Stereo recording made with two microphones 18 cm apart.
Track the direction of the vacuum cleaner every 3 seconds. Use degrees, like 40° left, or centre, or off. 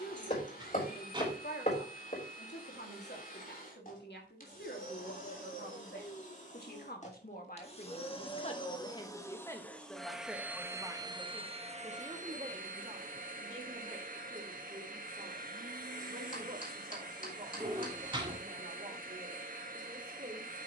50° left, 50° left, 40° left, 10° right, 50° right, 50° right, 50° right.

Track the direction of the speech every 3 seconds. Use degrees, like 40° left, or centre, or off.
70° left, 70° left, 50° left, centre, 40° right, 40° right, 40° right.